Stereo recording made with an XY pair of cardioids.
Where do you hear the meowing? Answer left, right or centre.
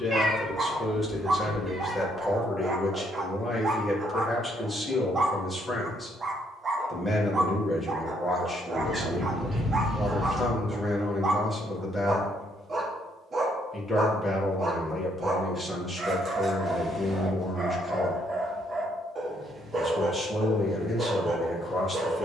right.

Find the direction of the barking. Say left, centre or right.
right.